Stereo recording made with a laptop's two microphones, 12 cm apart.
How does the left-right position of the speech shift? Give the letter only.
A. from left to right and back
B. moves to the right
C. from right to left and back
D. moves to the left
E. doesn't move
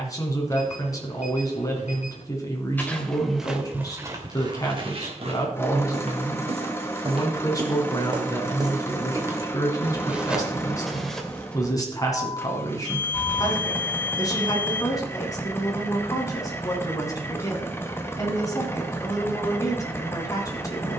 E.